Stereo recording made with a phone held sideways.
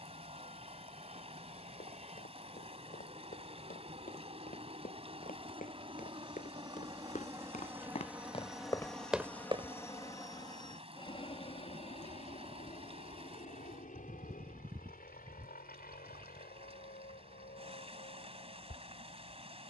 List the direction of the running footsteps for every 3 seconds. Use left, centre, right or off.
left, left, left, right, off, off, off.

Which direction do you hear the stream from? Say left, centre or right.
right.